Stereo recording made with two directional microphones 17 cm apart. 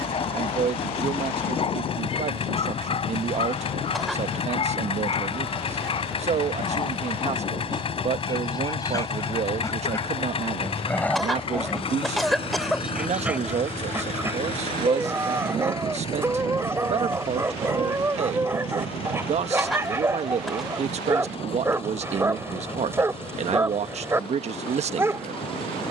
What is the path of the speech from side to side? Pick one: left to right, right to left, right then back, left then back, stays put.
stays put.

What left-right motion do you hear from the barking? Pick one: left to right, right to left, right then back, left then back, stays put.
left to right.